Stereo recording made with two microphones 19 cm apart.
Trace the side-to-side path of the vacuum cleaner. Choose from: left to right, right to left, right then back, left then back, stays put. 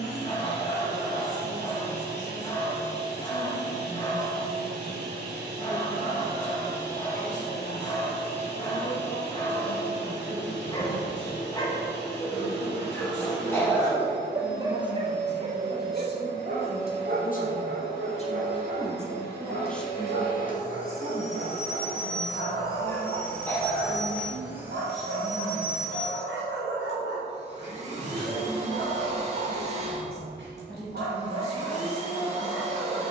left to right.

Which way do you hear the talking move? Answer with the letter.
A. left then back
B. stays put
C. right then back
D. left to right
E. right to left
D.